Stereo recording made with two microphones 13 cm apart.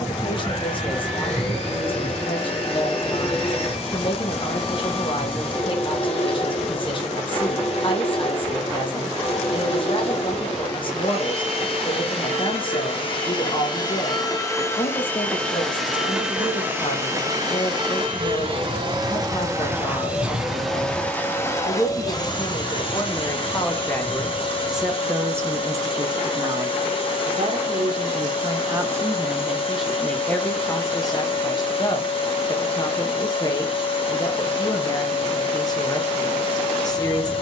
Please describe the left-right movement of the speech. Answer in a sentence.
You can hear the speech go right and come back.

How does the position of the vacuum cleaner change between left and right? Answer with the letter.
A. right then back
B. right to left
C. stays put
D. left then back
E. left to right
A.